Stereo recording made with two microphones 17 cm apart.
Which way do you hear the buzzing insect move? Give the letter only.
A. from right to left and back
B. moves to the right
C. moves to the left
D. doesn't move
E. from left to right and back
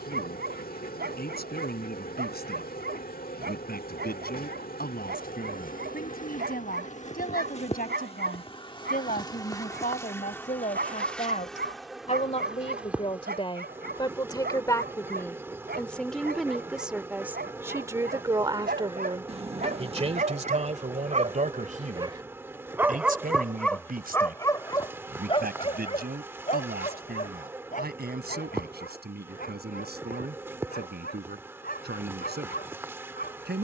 B.